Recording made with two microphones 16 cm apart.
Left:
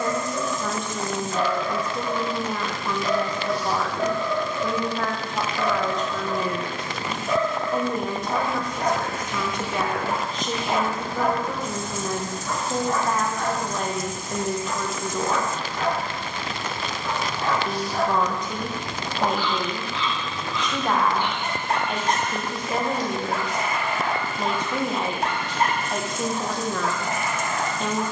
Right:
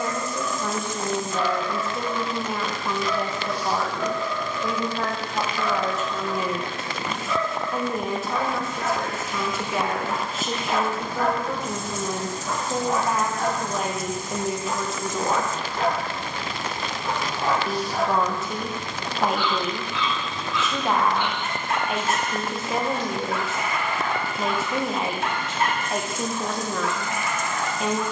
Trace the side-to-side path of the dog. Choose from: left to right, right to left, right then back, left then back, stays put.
right then back.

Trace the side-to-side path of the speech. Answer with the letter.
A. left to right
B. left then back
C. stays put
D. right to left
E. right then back
C.